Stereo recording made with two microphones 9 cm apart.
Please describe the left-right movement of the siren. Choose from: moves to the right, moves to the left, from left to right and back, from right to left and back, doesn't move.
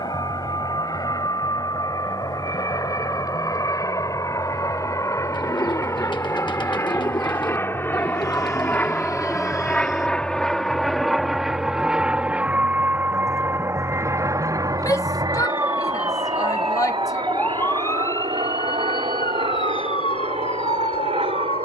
moves to the left.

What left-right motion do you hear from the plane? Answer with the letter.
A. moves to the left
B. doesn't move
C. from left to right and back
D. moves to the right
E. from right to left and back
D.